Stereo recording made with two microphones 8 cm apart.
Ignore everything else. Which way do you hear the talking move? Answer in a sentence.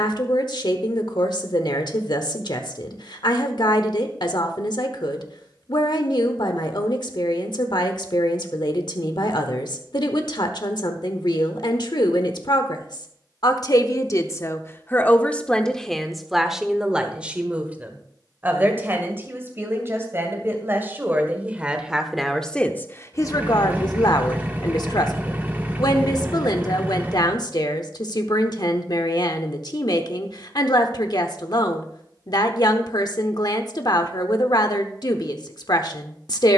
You can hear the talking move from left to right and back again.